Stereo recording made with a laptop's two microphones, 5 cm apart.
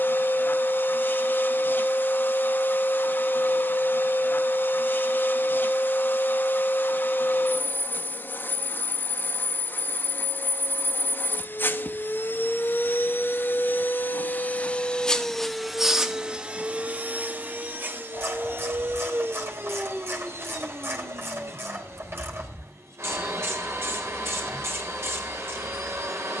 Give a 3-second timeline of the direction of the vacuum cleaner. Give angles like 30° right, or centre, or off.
40° left, 40° left, 40° left, 40° left, 40° left, 20° right, 50° right, 60° right, 60° right.